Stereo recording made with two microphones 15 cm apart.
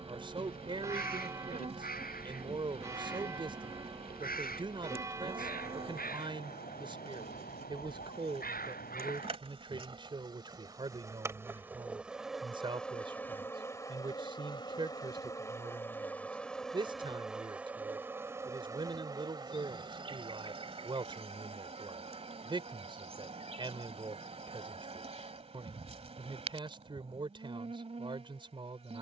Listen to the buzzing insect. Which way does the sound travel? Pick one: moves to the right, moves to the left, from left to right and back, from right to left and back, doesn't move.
from right to left and back.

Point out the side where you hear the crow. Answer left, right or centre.
left.